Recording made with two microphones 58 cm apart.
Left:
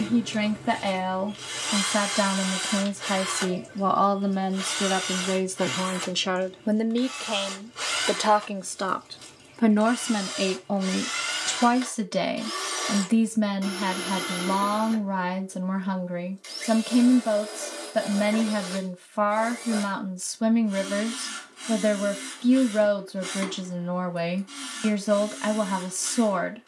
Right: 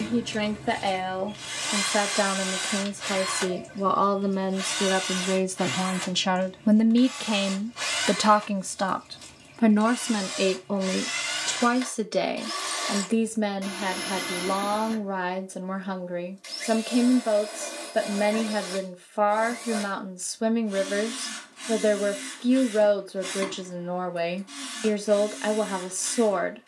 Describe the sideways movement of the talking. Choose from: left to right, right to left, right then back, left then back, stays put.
right then back.